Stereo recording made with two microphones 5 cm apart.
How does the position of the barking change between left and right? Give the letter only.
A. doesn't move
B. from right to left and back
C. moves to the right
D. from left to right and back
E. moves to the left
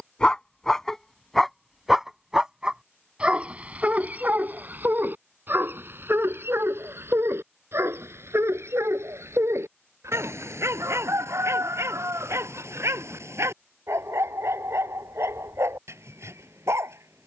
C.